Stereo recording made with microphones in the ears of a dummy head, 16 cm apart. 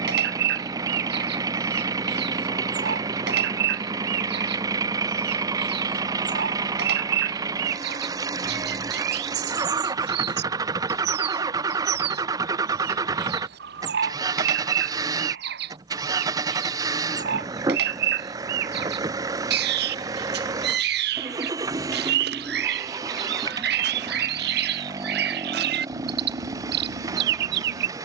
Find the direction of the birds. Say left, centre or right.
right.